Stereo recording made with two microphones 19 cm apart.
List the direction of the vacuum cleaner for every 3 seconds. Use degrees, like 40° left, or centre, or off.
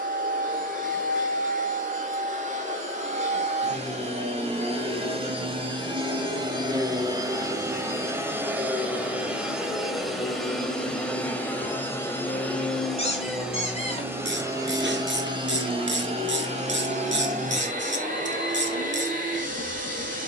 50° right, 30° right, 20° right, centre, 10° right, 40° right, 50° right.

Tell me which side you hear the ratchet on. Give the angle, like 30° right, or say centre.
80° right.